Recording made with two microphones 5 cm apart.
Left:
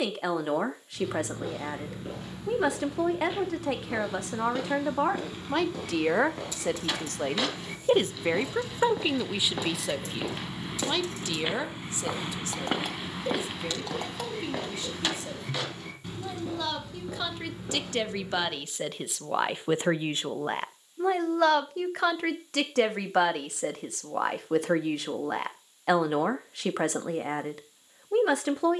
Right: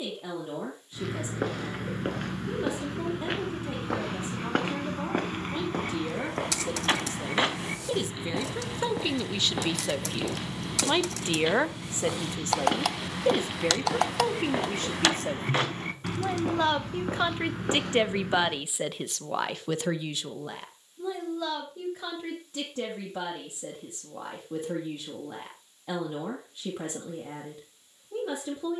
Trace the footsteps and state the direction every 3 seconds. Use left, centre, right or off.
right, right, right, centre, centre, right, right, off, off, off.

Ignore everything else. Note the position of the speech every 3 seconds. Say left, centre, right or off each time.
left, left, left, centre, right, right, centre, left, left, left.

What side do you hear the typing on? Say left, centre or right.
right.